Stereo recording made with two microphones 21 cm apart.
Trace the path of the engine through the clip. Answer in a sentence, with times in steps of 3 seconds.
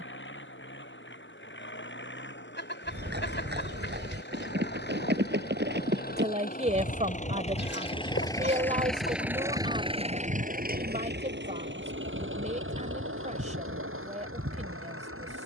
You can hear the engine on the left from 0 s and on the right from 9 s.